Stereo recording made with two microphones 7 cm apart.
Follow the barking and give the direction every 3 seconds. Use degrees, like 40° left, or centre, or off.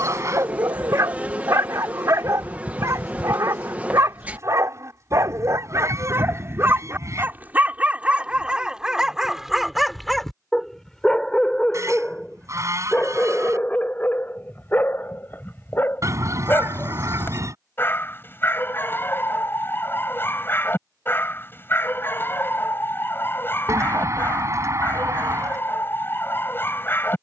40° right, 40° right, 20° right, centre, 20° left, 30° left, 30° left, 30° left, 30° left.